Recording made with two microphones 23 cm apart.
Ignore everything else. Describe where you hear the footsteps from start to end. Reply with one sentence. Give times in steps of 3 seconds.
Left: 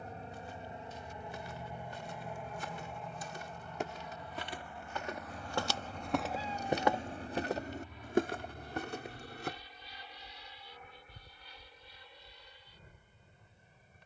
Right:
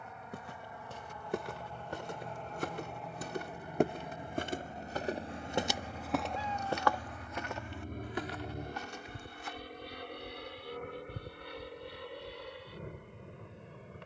You can hear the footsteps on the right from 0 s, on the left from 6 s and not at all from 12 s.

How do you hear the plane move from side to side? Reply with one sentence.
You can hear the plane move to the right.